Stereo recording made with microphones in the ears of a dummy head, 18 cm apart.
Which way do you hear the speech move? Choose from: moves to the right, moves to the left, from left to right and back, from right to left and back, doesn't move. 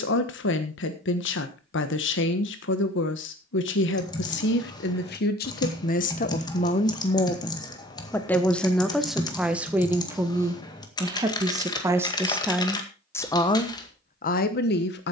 from left to right and back.